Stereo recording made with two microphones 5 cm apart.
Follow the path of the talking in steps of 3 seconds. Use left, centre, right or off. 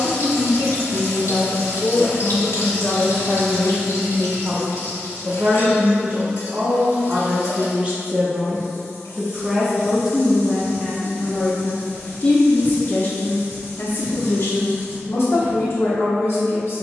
left, centre, right, centre, left, left.